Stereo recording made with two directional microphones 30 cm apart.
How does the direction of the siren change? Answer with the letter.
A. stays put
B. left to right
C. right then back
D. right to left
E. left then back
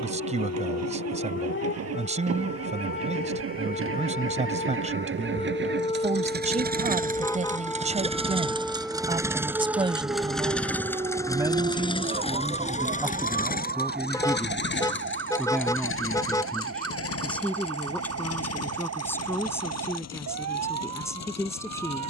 B.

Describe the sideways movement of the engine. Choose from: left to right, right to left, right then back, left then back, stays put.
right to left.